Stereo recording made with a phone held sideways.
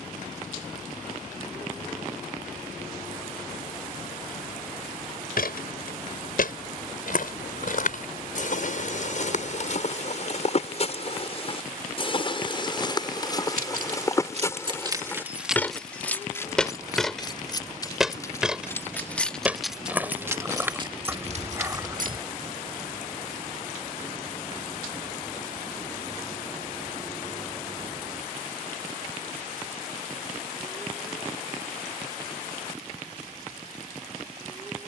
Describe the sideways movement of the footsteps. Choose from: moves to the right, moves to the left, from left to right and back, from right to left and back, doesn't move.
moves to the right.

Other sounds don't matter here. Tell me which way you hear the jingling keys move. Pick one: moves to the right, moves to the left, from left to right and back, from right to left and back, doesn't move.
from right to left and back.